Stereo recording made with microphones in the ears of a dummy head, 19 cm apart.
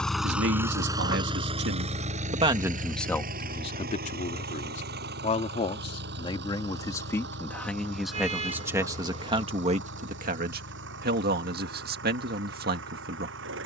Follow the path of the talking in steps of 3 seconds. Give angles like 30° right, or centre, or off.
40° right, 30° left, 10° left, 40° right, 50° right.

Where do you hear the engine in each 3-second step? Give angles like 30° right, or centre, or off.
20° right, 50° right, 50° right, 60° right, 60° right.